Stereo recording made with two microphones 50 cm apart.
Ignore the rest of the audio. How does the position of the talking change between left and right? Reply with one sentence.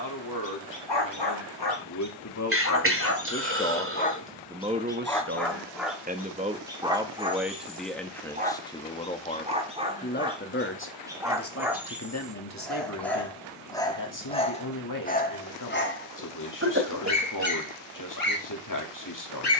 You can hear the talking move from left to right and back again.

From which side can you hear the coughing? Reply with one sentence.
You can hear the coughing on the right.